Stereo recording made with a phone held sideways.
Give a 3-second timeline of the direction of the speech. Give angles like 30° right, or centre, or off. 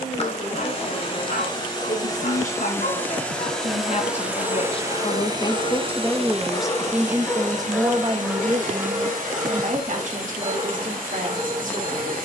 70° left, 40° left, 20° right, 60° right.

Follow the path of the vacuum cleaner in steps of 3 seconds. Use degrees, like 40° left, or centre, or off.
30° left, 10° right, 60° right, 70° right.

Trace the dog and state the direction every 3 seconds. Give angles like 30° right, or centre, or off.
70° left, 50° left, 10° left, 30° right.